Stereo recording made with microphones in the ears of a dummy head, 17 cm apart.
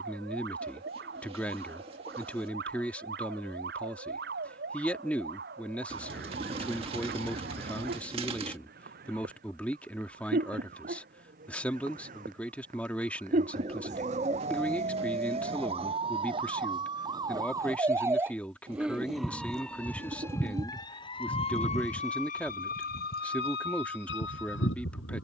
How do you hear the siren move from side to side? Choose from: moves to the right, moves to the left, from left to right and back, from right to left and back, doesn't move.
moves to the left.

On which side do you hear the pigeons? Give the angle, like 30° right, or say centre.
30° right.